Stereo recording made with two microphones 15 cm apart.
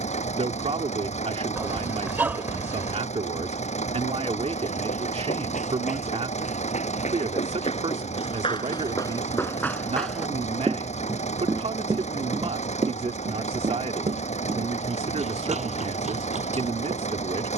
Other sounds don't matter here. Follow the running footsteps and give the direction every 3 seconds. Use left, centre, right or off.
off, left, left, centre, right, right.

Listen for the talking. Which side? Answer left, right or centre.
right.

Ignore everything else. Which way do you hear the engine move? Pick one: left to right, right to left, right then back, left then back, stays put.
stays put.